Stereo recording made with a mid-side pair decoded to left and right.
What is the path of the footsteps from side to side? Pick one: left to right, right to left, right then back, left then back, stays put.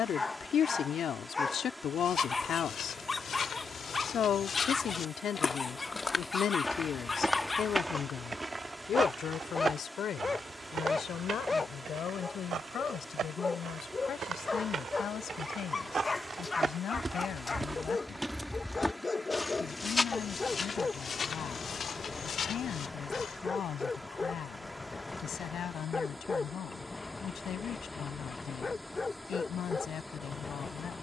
right then back.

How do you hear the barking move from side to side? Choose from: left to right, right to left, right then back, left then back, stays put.
stays put.